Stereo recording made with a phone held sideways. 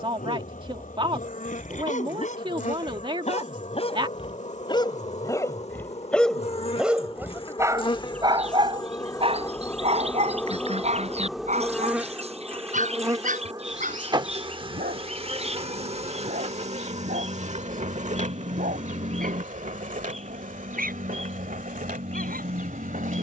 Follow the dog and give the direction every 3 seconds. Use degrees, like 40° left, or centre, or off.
60° left, 30° left, 20° right, 50° right, 60° right, 70° right, 70° right, 80° right.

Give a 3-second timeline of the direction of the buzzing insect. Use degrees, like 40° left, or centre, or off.
60° left, 50° left, 40° left, 10° left, 30° right, 50° right, 60° right, 70° right.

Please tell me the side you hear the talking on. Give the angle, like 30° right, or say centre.
40° right.